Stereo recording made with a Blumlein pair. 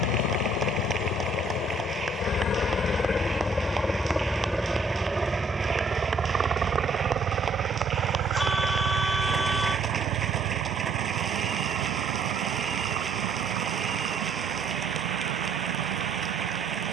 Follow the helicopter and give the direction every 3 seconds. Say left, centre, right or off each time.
left, centre, right, right, right, right.